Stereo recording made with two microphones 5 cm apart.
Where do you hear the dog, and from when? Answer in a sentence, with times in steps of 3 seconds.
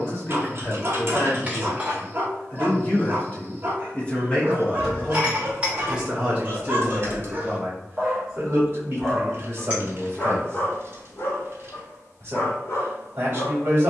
You can hear the dog on the right from 0 s and on the left from 9 s.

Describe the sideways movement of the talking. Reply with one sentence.
In this clip you hear the talking move from left to right.